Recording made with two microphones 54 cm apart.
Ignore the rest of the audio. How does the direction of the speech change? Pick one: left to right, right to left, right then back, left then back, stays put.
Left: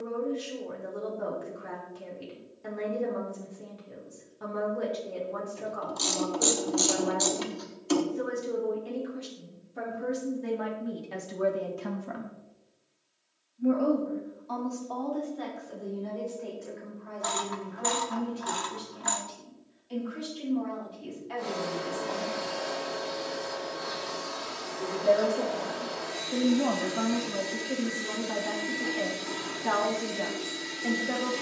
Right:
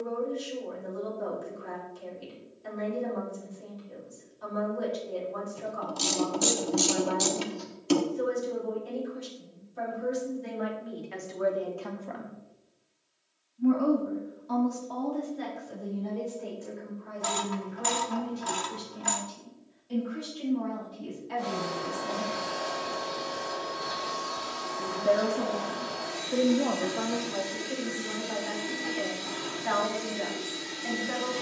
right then back.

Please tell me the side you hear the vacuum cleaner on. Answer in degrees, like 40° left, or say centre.
50° right.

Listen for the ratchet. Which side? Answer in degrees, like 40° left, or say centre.
50° right.